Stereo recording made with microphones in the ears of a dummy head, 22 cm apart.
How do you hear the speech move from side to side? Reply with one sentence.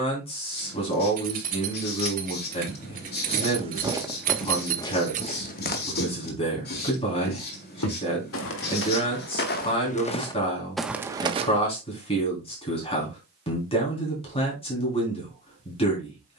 In this clip you hear the speech stay put.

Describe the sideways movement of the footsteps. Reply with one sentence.
In this clip you hear the footsteps go left and come back.